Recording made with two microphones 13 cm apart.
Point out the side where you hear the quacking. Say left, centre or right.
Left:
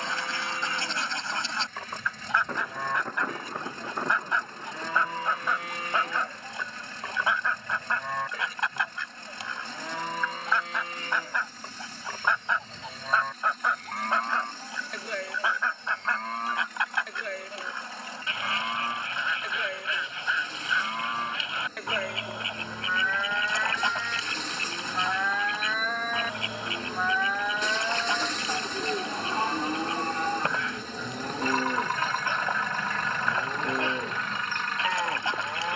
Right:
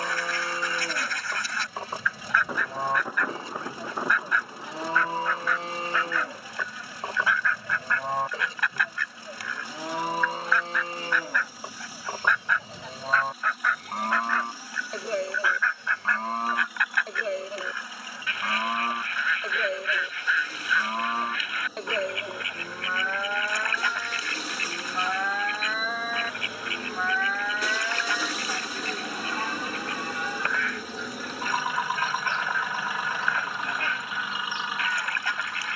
left.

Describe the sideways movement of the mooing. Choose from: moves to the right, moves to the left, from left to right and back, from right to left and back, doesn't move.
moves to the left.